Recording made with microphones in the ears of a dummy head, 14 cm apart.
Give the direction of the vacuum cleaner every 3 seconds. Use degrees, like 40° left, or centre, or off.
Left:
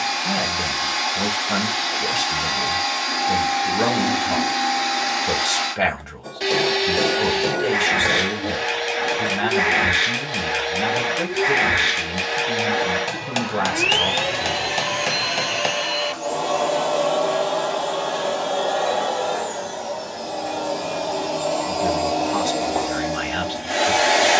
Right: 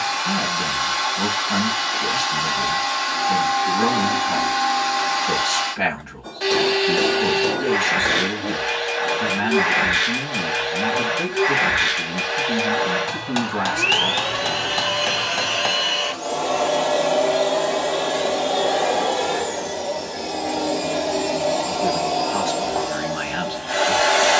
20° left, 20° left, 20° left, 20° left, 20° left, centre, 20° right, 10° left.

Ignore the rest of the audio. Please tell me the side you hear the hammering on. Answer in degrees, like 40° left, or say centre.
20° left.